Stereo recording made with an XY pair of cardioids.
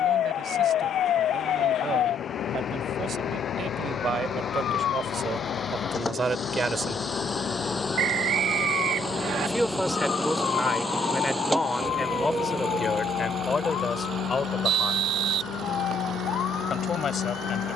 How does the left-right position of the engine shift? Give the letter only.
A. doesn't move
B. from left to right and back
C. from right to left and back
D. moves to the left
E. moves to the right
E.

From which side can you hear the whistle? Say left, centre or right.
right.